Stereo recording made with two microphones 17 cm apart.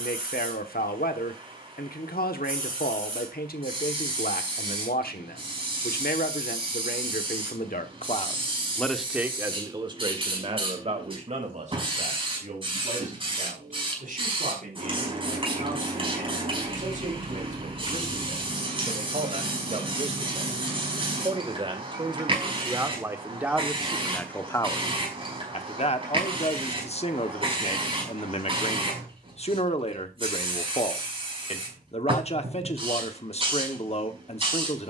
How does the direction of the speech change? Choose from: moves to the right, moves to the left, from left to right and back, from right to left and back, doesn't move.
from left to right and back.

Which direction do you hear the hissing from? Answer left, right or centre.
right.